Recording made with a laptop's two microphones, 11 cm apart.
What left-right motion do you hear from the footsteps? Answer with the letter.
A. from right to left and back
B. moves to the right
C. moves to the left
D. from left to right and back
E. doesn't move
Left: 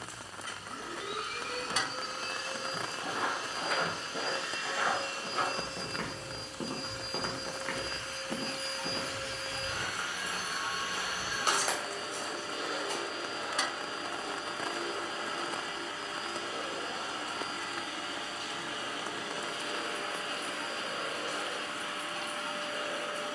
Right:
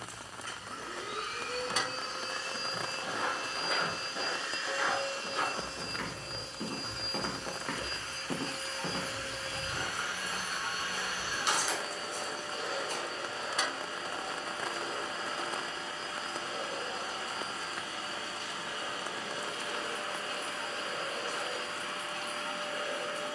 D.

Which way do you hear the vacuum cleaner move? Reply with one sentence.
In this clip you hear the vacuum cleaner stay in one place.